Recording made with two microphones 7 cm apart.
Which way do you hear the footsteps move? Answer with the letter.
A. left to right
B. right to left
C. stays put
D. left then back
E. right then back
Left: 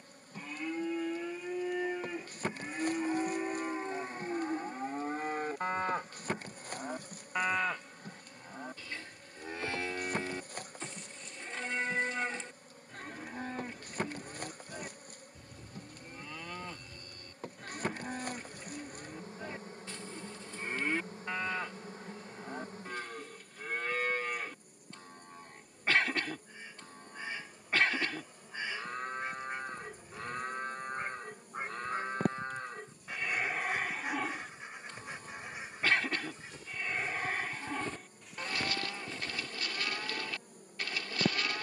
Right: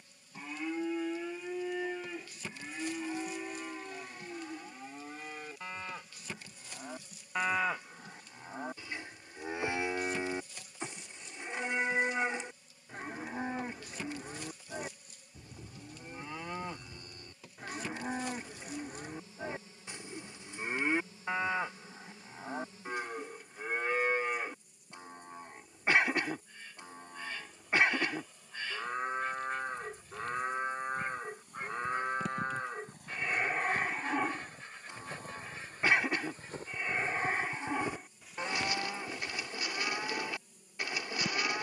B.